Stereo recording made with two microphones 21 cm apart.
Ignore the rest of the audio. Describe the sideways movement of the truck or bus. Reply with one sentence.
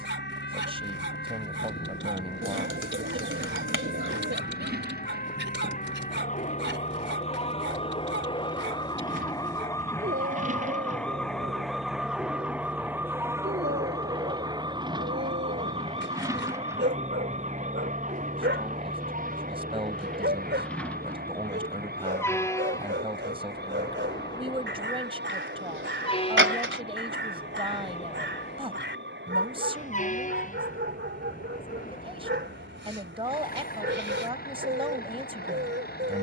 You can hear the truck or bus travel towards the left.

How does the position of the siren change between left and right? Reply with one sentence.
In this clip you hear the siren move from left to right.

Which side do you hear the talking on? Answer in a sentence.
In this clip you hear the talking on the right.